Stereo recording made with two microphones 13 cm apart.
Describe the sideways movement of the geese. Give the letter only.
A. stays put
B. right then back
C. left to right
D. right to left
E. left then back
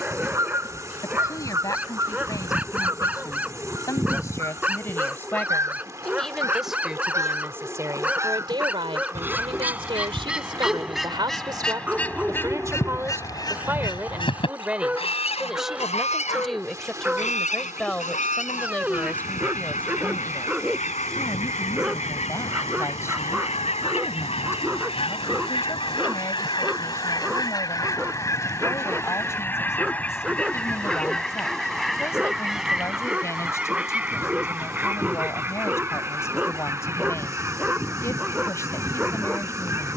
E.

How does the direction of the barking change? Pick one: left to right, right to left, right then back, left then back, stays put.
stays put.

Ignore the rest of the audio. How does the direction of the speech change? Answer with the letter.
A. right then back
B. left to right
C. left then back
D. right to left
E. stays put
A.